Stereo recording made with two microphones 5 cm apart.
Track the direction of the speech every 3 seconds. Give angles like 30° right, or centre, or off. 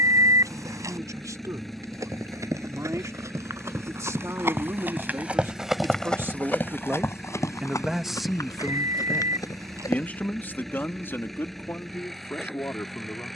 70° right, 60° right, 20° right, 30° left, 50° left.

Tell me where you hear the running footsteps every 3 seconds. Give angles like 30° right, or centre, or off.
60° right, 40° right, 50° left, 80° left, off.